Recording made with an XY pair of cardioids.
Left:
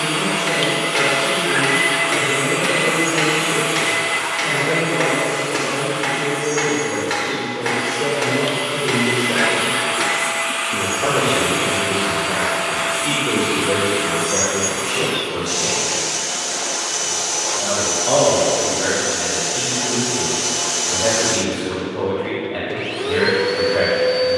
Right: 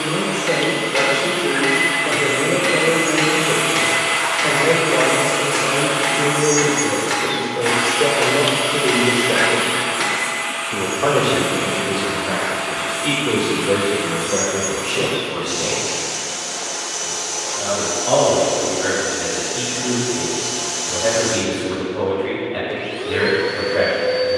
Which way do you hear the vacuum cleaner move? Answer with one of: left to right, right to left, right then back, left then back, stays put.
right then back.